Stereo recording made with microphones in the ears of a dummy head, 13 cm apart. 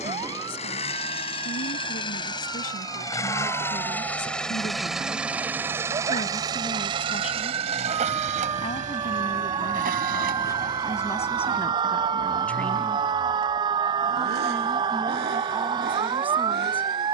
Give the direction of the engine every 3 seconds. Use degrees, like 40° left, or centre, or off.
40° left, centre, 40° right, 60° right, 80° right, 80° right.